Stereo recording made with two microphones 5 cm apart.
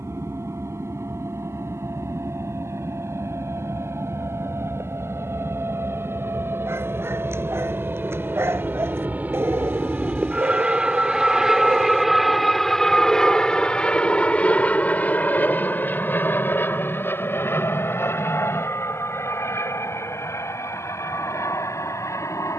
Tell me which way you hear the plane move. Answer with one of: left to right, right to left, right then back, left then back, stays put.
right to left.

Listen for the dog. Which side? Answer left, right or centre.
right.